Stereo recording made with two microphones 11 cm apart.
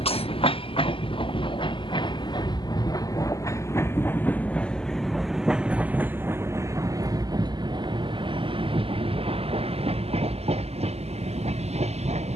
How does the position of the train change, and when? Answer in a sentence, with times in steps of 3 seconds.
You can hear the train on the left from 0 s, in the centre from 3 s and on the right from 6 s.